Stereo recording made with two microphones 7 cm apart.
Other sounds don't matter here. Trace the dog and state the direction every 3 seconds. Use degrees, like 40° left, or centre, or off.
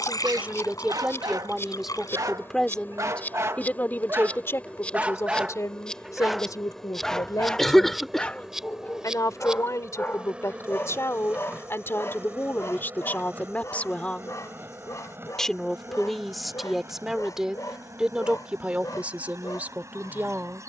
60° right, 30° right, 10° left, 30° left, 40° left, 50° left, 50° left.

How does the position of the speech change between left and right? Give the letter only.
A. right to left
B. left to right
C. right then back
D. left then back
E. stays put
D.